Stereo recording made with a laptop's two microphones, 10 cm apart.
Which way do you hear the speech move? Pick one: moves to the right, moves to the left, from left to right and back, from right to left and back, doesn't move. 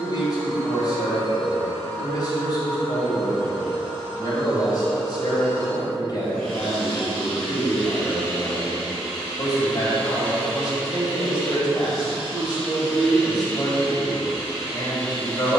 doesn't move.